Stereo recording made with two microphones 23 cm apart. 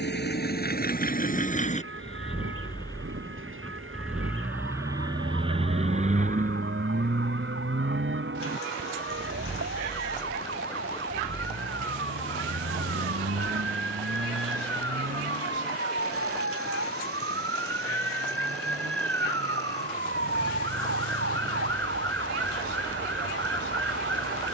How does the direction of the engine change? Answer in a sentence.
You can hear the engine travel towards the right.